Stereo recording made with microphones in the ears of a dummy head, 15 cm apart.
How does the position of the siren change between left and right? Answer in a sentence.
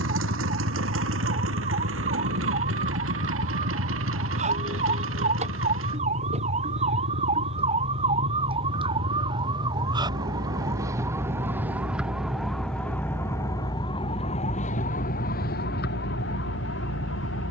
You can hear the siren go from the right side to the left.